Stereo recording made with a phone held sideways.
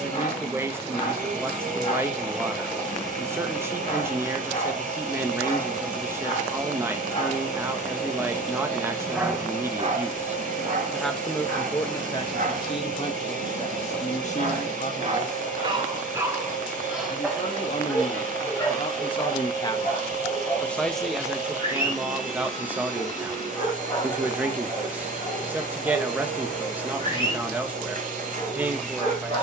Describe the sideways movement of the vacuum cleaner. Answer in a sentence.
In this clip you hear the vacuum cleaner stay in one place.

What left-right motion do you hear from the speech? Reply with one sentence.
You can hear the speech go left and come back.